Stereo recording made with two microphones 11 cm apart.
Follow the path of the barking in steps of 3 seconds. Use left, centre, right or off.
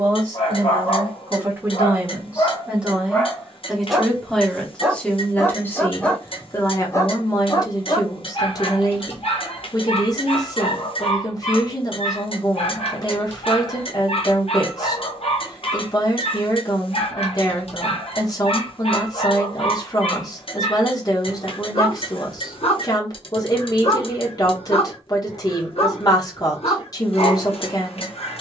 left, centre, left, left, left, left, left, left, left, left.